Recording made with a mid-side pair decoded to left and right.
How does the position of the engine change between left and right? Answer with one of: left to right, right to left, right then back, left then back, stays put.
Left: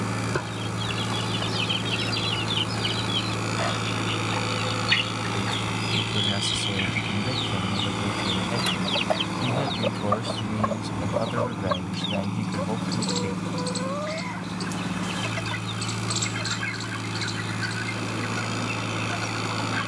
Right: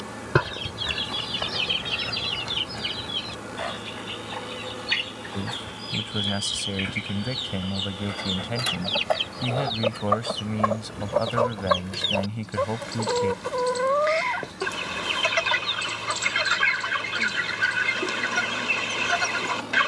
stays put.